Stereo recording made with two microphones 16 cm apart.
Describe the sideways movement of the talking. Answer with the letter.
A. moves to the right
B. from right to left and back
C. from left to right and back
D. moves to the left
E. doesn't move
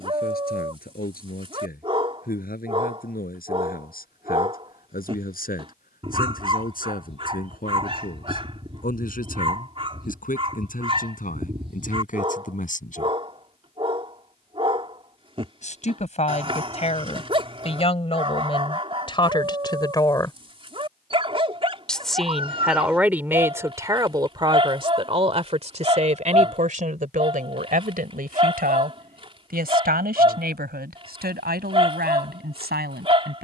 A.